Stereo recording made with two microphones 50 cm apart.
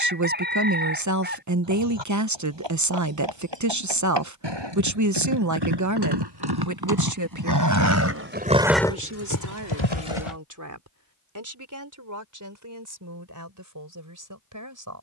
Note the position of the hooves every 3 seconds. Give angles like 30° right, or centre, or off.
60° right, 60° right, 30° right, 60° left, off.